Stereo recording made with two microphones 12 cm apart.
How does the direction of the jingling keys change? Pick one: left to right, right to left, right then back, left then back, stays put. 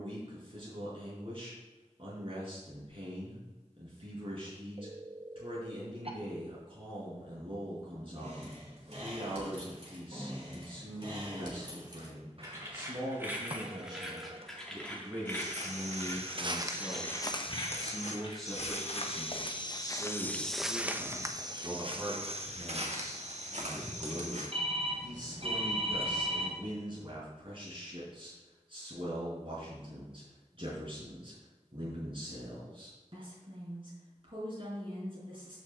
right to left.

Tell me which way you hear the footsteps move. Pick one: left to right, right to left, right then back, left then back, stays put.
left then back.